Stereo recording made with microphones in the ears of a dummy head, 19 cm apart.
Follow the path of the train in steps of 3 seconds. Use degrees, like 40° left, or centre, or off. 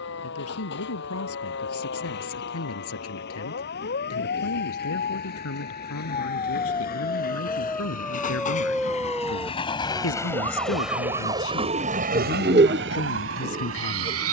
60° left, 50° left, 40° left, centre, 70° right.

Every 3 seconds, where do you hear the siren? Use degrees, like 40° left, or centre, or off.
60° left, 50° left, 20° left, 20° right, 50° right.